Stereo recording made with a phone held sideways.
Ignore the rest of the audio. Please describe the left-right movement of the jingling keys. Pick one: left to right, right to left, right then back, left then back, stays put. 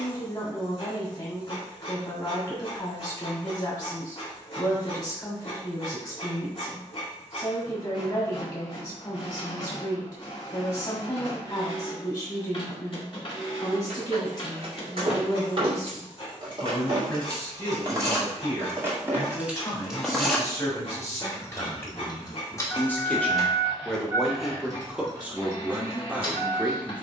left then back.